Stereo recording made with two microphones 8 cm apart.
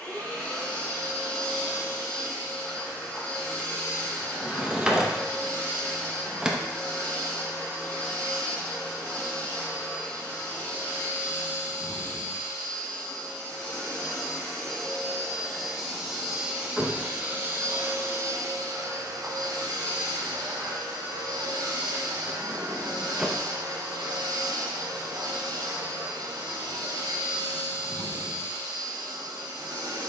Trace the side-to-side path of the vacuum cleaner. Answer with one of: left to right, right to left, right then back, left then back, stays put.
left to right.